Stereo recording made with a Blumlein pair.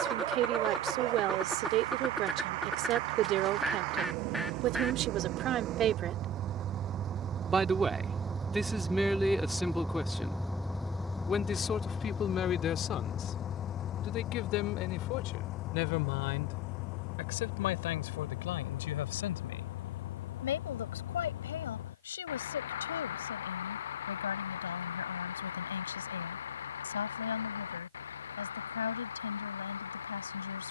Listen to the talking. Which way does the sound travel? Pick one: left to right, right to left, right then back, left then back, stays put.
right to left.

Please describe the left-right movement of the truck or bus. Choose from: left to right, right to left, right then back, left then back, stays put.
right to left.